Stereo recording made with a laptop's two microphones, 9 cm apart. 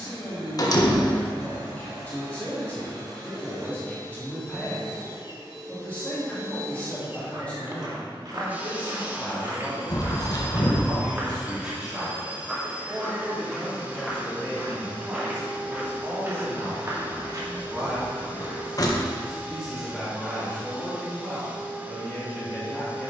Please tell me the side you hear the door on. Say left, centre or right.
left.